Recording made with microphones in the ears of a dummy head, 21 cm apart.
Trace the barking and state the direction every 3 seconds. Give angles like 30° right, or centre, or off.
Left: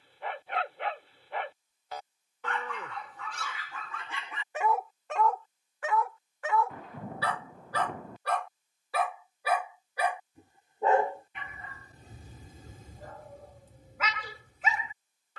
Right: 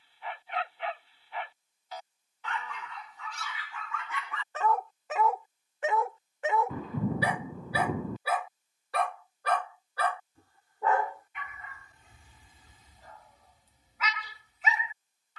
40° left, 20° left, 10° right, 20° left, 40° left.